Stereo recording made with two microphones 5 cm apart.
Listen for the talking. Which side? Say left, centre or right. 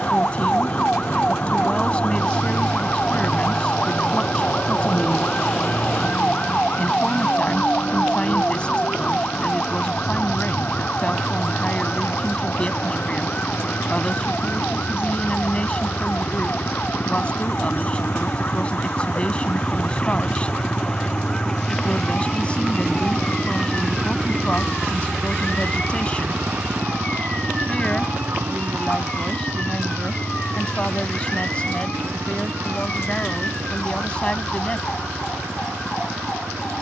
left.